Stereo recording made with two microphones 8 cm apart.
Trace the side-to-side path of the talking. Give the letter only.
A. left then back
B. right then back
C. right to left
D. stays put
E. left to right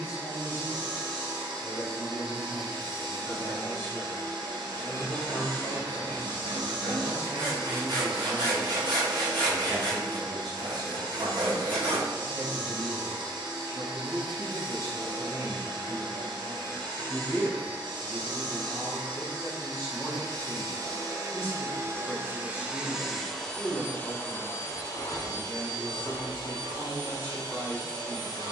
B.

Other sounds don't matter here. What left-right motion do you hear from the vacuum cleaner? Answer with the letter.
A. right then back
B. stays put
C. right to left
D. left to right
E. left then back
C.